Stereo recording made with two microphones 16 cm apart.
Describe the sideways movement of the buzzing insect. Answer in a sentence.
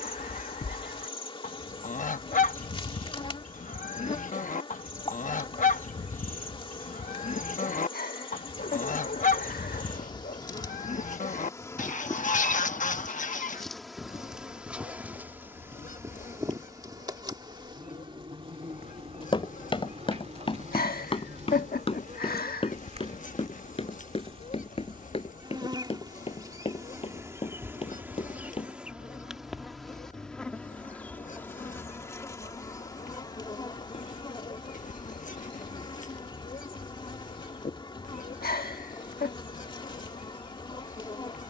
You can hear the buzzing insect move from left to right and back again.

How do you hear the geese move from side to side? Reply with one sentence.
You can hear the geese stay put.